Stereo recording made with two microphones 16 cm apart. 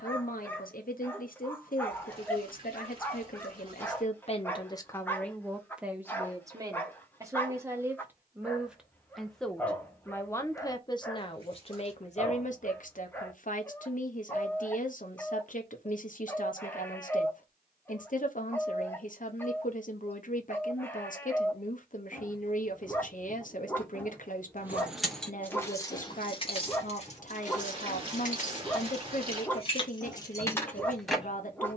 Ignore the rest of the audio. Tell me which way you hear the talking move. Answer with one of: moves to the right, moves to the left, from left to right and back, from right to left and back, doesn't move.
from left to right and back.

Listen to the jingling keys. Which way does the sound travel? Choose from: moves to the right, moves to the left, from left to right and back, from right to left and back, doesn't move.
from right to left and back.